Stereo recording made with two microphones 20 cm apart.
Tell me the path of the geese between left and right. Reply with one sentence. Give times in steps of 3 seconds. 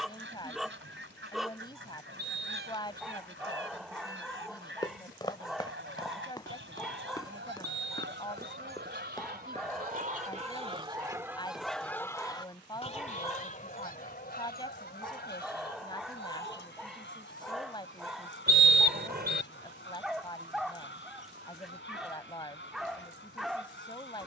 You can hear the geese on the right from 0 s and on the left from 12 s.